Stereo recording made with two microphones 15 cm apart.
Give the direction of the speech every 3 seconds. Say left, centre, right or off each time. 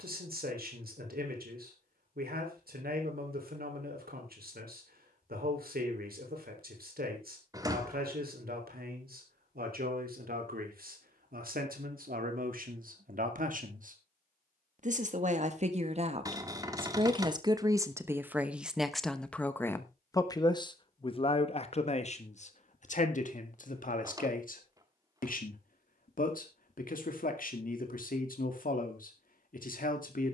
right, right, right, right, right, right, centre, left, left, left.